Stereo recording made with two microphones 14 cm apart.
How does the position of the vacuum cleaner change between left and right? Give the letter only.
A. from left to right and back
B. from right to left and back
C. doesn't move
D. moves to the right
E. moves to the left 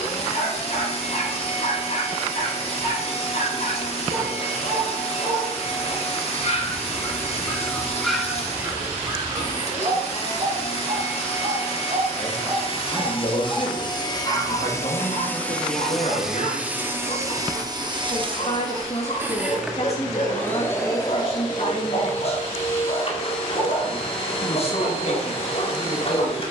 A.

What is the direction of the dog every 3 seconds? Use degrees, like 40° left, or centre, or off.
60° left, 60° left, 10° left, 40° right, centre, 50° left, 50° left, 50° left, 50° left.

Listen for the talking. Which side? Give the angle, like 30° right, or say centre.
50° left.